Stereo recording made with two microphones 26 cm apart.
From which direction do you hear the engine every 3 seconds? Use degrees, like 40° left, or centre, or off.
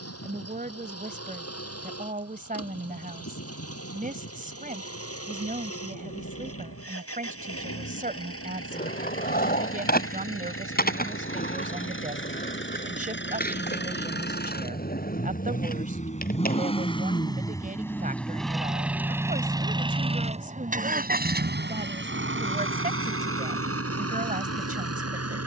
60° left, 60° left, 60° left, 50° left, 40° left, 20° left, 10° right, 50° right, 60° right.